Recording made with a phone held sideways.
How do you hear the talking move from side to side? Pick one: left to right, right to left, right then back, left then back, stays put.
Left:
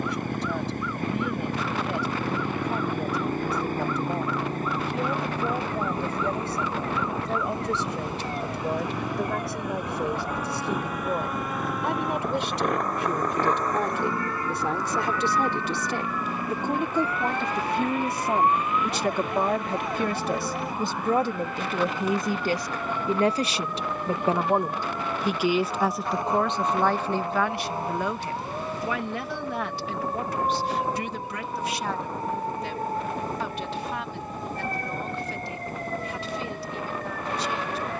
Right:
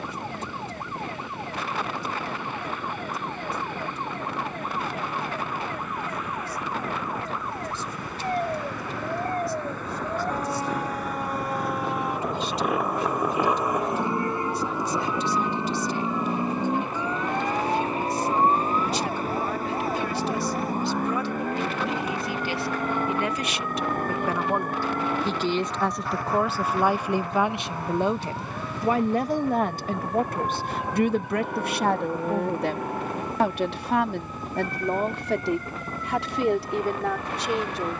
left to right.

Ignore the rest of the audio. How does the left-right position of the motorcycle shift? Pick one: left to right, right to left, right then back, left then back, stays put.
left to right.